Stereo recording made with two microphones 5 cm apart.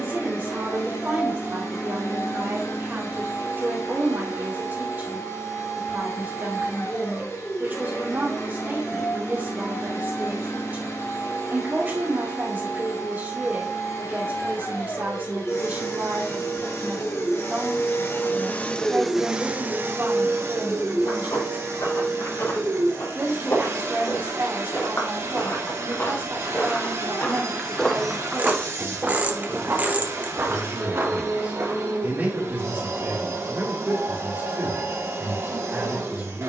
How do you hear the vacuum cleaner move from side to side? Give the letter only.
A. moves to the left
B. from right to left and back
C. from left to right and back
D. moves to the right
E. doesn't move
D.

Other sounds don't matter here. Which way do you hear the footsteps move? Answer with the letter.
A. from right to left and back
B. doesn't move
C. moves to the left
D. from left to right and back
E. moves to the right
E.